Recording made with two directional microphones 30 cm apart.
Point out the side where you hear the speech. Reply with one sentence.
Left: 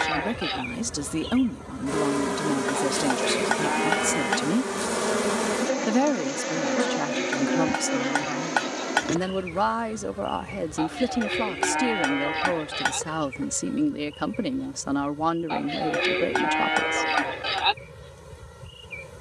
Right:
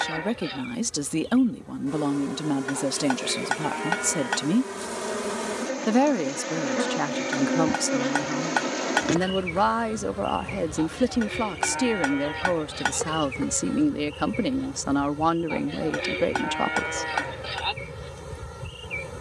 You can hear the speech in the centre.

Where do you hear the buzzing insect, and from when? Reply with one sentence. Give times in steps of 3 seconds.
You can hear the buzzing insect on the left from 0 s, in the centre from 6 s and on the right from 9 s.